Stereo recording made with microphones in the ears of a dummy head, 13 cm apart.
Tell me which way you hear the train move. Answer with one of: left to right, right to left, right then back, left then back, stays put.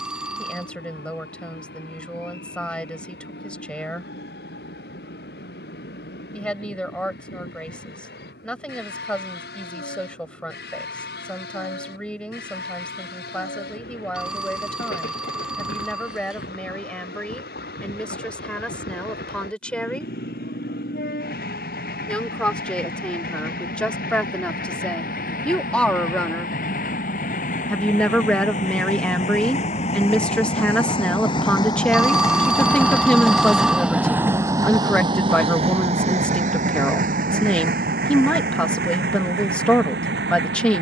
left to right.